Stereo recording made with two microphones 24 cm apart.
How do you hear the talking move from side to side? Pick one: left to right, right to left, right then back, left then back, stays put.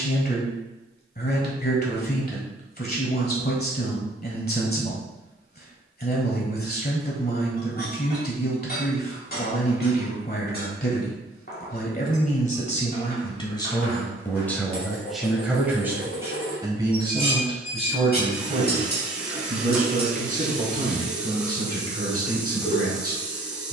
left to right.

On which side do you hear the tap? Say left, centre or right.
centre.